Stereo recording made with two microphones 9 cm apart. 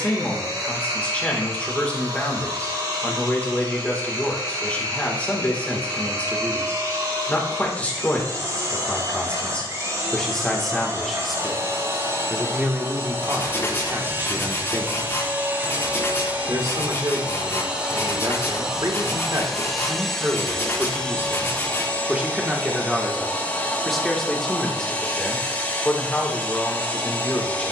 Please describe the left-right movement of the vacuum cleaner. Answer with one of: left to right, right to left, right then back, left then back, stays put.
right to left.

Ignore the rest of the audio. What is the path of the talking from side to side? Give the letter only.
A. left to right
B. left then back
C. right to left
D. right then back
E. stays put
D.